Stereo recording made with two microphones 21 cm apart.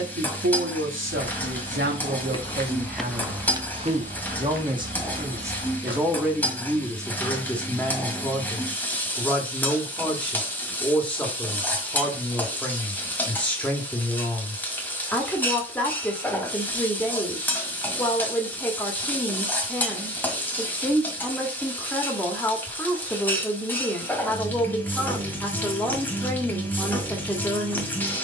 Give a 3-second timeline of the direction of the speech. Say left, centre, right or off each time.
right, right, centre, centre, centre, centre, centre, centre, centre, centre.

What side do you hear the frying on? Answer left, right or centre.
centre.